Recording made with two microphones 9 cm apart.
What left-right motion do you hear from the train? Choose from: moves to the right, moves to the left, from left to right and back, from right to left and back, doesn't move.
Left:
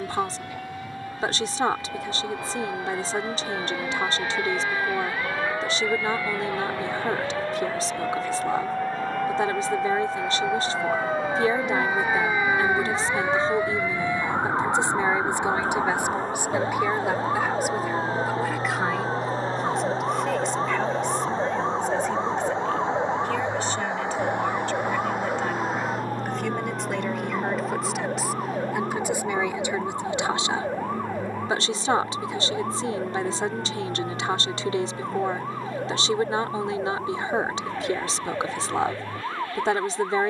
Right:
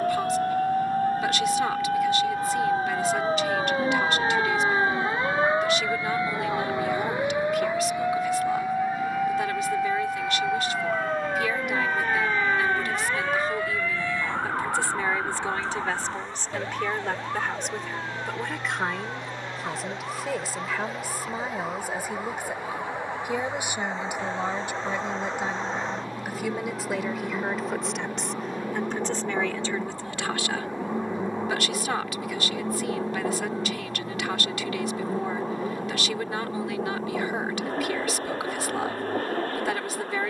moves to the right.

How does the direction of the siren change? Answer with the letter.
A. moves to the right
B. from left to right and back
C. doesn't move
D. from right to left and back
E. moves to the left
E.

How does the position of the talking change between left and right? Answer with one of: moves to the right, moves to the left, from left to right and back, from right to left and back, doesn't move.
from left to right and back.